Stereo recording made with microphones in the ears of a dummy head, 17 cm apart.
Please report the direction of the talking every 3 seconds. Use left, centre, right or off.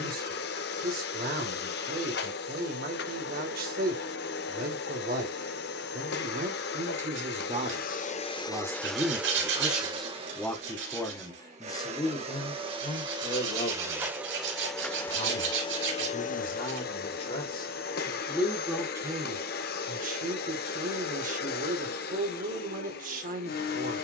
right, right, right, centre, left, left, right, right.